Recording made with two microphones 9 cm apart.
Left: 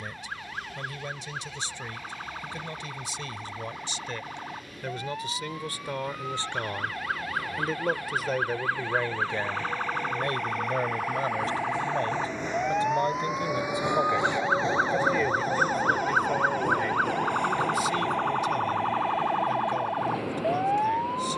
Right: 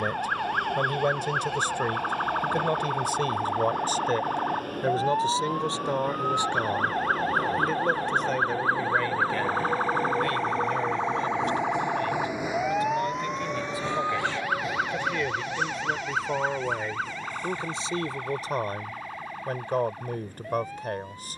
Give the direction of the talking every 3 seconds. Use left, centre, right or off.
right, right, centre, left, left, centre, right.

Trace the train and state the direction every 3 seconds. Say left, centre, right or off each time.
right, right, right, right, centre, left, left.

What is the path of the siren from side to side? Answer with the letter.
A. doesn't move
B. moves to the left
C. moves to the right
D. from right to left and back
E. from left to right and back
B.